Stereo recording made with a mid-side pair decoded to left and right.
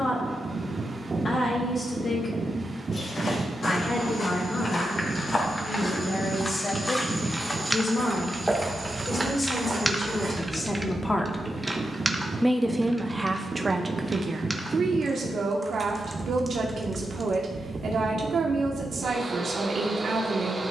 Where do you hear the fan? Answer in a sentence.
In this clip you hear the fan on the right.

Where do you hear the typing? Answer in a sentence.
In this clip you hear the typing in the centre.